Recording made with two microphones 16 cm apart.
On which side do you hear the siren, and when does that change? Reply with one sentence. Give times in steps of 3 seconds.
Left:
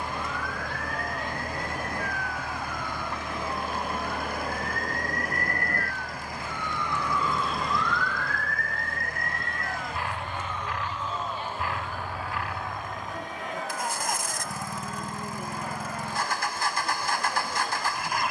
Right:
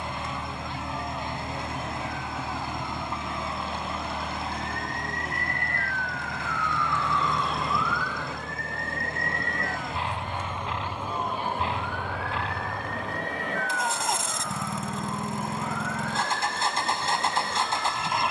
In this clip you hear the siren on the left from 0 s, in the centre from 6 s and on the right from 9 s.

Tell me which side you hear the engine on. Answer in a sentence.
You can hear the engine on the right.